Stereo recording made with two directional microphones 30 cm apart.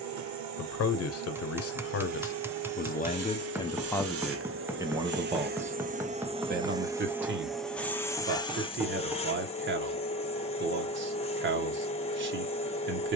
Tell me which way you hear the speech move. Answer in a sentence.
In this clip you hear the speech move to the right.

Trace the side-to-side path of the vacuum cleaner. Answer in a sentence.
In this clip you hear the vacuum cleaner move from right to left.